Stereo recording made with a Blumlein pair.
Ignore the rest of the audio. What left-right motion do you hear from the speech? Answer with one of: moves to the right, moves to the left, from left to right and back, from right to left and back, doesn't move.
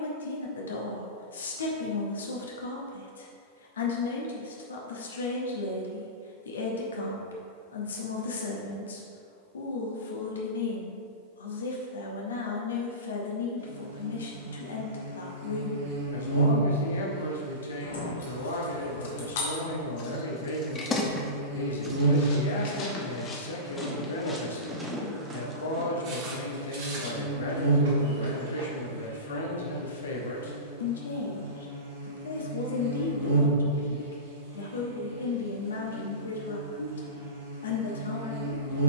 doesn't move.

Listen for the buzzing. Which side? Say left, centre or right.
right.